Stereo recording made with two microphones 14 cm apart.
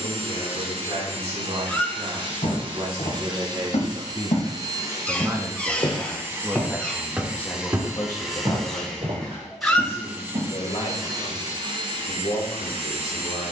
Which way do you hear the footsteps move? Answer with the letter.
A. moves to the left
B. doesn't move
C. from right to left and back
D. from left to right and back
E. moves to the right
E.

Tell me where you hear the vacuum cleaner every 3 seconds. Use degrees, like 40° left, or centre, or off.
50° right, 30° right, 10° right, 20° right, 50° right.